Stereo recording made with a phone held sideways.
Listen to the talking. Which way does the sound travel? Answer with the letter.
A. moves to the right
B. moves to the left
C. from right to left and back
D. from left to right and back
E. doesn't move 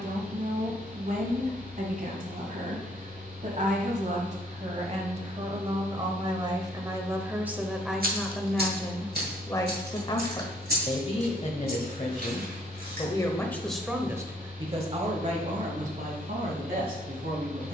C.